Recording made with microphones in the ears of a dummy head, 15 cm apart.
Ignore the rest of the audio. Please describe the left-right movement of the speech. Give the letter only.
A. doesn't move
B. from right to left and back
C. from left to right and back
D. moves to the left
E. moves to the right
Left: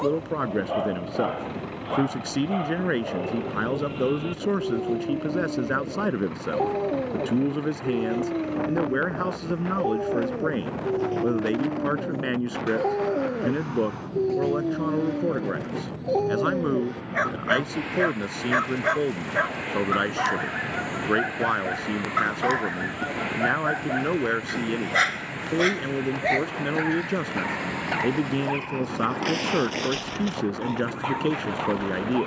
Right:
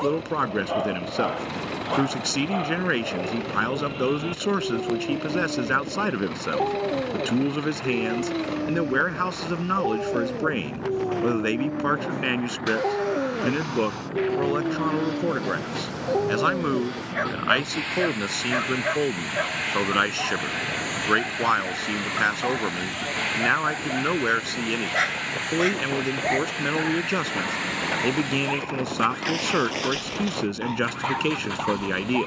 A.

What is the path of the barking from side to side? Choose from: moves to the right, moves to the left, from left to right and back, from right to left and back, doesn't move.
from right to left and back.